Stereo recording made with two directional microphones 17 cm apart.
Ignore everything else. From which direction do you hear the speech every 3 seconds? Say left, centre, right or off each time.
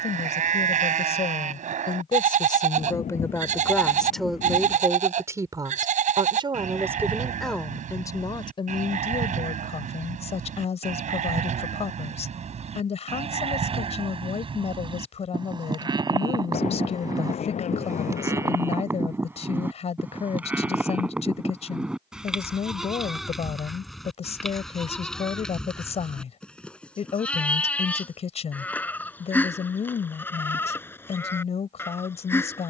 left, centre, centre, left, left, left, left, left, left, left, left.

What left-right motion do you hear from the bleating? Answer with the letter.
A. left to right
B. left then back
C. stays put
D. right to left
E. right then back
D.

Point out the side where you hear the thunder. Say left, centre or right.
left.